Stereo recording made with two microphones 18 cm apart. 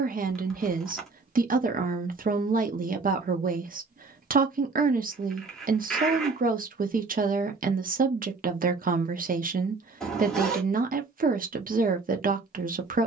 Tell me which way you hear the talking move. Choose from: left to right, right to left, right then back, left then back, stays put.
stays put.